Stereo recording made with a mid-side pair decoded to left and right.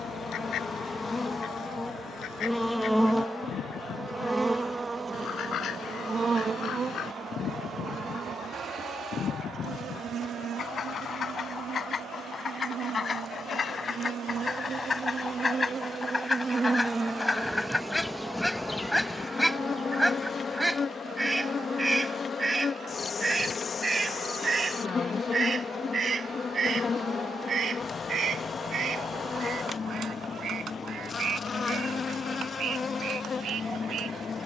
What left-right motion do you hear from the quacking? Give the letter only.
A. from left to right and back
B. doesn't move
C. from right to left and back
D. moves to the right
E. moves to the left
D.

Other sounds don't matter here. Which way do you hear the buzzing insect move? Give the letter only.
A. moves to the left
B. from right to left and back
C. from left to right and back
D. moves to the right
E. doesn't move
C.